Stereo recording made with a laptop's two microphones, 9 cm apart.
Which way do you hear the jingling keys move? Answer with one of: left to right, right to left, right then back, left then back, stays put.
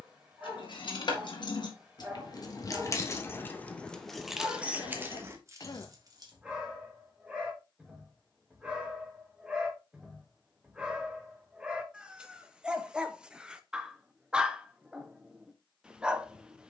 left to right.